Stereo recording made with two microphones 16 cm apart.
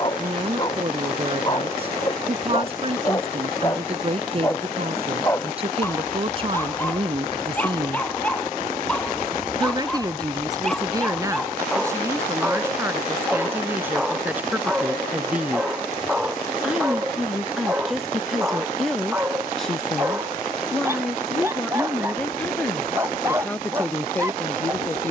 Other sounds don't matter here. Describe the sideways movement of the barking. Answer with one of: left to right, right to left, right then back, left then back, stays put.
left to right.